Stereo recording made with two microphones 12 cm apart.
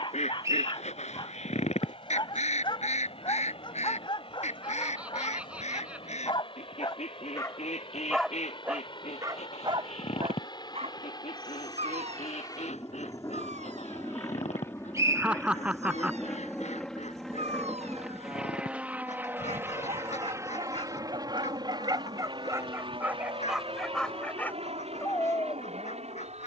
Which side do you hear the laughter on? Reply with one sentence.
You can hear the laughter in the centre.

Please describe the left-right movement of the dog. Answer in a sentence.
In this clip you hear the dog move from left to right and back again.